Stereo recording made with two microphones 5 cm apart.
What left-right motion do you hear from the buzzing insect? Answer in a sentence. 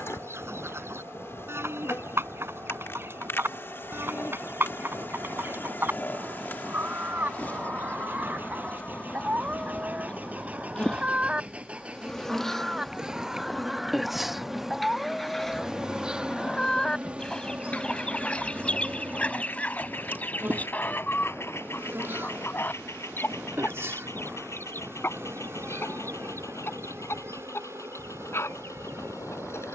In this clip you hear the buzzing insect travel towards the right.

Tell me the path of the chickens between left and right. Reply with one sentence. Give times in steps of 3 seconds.
In this clip you hear the chickens on the right from 0 s, in the centre from 12 s and on the left from 18 s.